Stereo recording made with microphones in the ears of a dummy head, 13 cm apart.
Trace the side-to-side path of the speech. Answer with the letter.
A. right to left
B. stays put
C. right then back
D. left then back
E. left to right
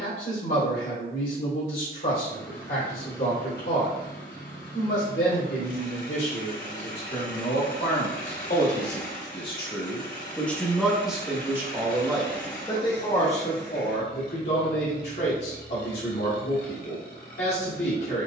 C.